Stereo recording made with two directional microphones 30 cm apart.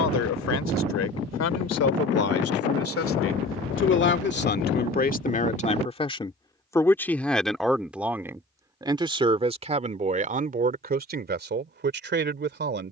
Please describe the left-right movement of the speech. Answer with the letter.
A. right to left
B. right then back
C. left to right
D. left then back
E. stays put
C.